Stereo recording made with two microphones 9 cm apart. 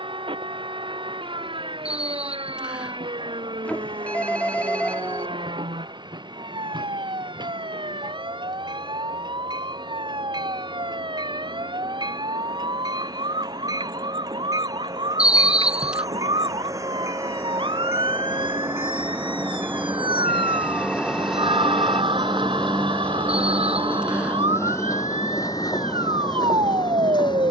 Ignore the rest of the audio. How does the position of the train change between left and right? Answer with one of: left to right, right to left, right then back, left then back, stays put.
right to left.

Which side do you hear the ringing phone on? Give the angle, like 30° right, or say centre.
20° left.